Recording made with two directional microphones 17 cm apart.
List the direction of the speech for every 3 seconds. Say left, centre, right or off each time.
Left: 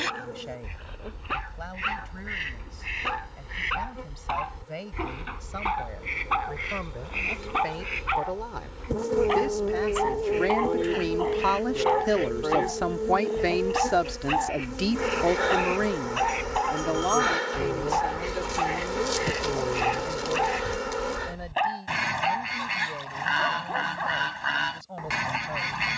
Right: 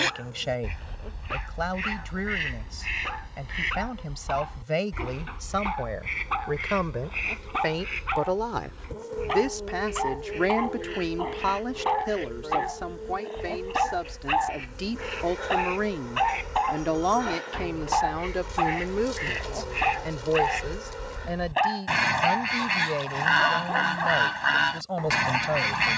right, right, right, centre, left, centre, right, right, right.